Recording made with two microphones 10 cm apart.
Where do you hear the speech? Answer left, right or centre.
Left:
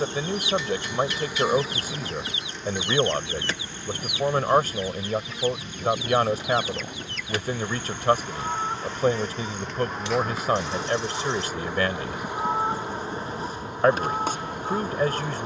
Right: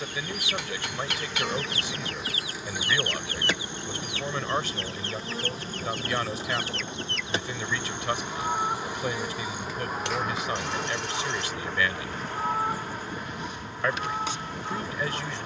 left.